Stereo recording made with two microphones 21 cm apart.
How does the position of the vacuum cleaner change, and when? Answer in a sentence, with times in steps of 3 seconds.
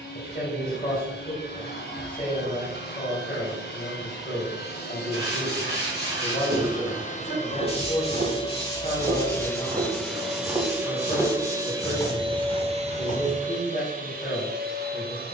You can hear the vacuum cleaner on the left from 0 s, in the centre from 9 s and on the right from 12 s.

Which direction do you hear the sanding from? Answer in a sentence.
You can hear the sanding on the left.